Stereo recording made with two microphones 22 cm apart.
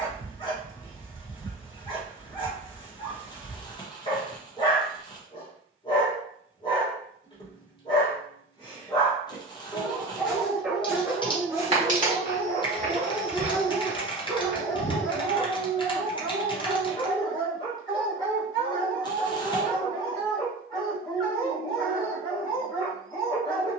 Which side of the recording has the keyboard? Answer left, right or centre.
left.